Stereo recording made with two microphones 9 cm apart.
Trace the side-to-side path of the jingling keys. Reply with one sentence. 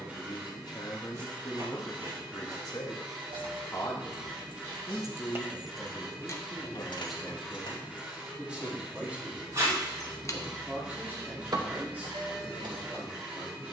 You can hear the jingling keys move from right to left and back again.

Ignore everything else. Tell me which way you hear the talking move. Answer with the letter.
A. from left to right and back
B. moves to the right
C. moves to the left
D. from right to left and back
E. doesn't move
B.